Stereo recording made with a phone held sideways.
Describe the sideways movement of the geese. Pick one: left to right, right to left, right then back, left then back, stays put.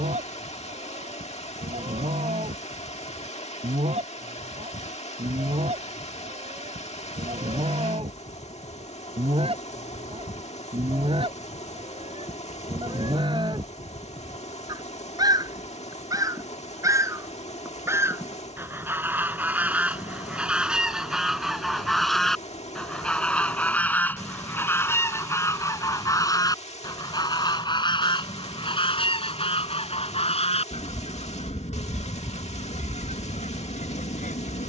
right to left.